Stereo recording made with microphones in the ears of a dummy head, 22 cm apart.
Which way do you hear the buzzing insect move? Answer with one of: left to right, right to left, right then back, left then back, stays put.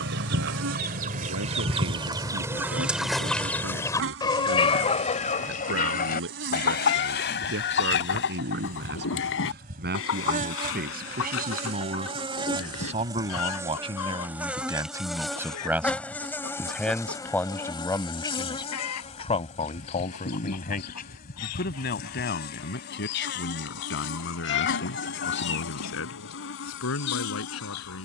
right to left.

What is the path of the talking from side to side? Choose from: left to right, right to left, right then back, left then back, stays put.
right to left.